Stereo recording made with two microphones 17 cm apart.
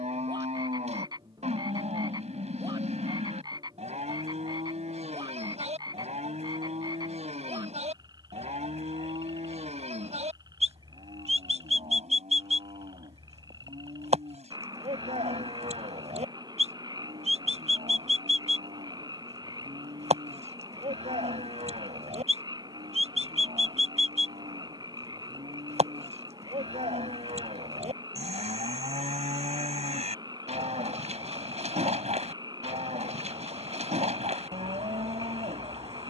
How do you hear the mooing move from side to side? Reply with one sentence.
You can hear the mooing stay put.